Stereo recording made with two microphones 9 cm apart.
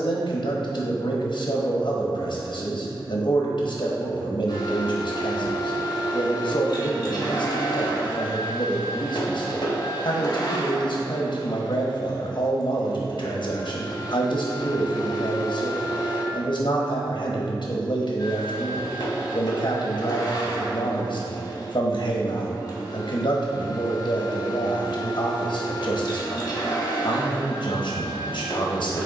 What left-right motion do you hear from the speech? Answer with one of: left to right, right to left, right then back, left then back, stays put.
stays put.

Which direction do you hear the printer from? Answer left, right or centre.
left.